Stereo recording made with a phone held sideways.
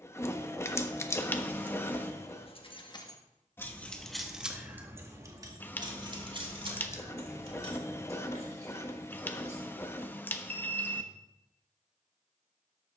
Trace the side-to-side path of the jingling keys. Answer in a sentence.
You can hear the jingling keys go from the left side to the right.